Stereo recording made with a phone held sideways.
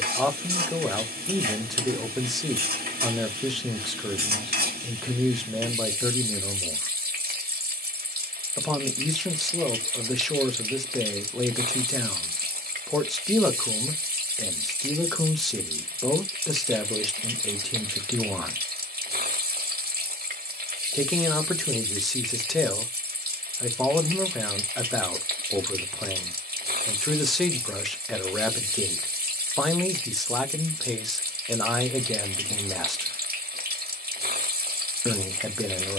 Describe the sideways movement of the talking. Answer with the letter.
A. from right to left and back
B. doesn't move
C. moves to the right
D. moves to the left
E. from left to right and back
B.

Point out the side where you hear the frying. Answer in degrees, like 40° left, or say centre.
70° right.